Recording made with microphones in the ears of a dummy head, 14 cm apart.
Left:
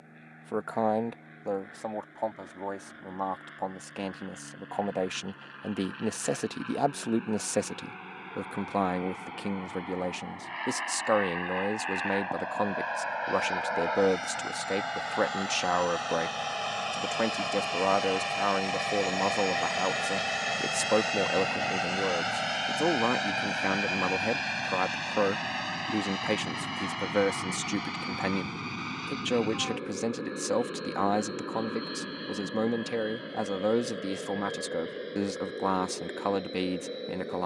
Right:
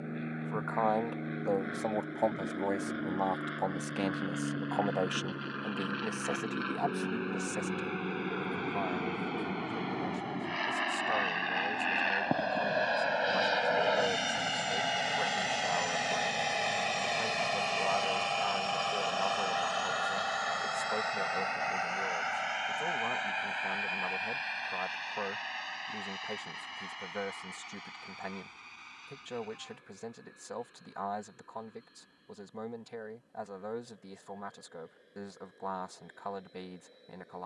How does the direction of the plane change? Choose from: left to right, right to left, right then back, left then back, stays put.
right to left.